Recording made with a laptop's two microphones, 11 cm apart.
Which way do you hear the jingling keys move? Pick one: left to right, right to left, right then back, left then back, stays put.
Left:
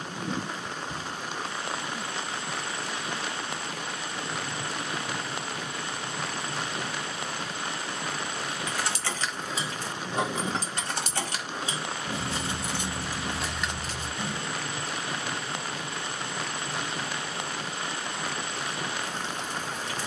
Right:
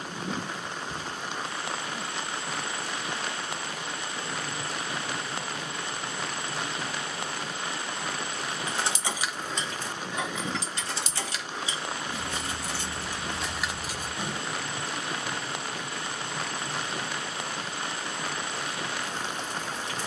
left then back.